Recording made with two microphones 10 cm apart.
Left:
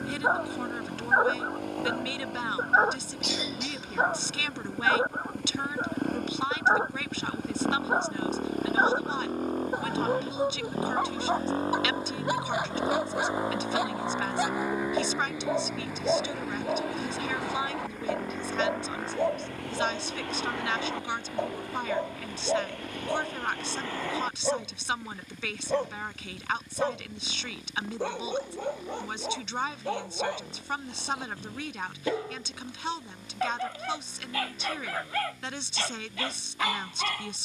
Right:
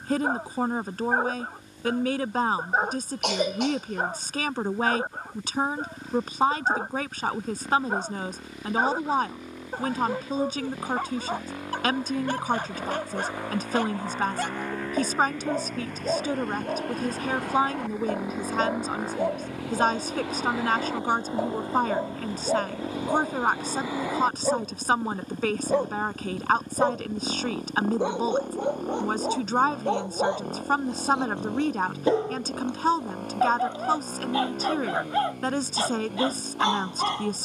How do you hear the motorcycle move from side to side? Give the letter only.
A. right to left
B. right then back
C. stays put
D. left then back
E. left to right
E.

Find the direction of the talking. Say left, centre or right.
right.